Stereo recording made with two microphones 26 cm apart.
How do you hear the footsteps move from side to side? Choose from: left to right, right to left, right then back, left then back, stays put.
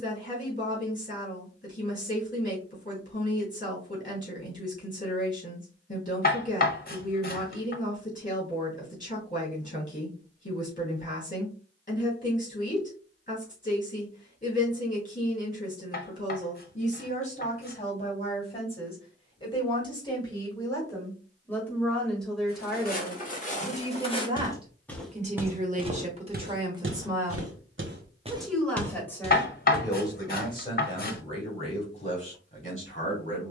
right then back.